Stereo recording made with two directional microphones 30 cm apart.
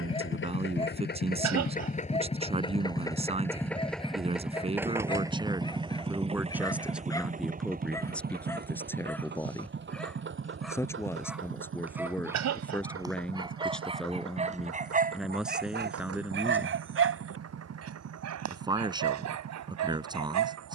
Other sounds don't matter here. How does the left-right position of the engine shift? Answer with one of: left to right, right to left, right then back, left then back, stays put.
left to right.